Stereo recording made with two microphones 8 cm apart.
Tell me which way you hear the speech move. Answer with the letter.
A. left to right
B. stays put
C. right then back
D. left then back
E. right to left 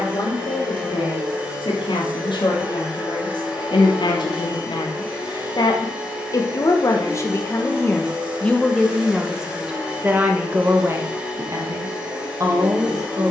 A.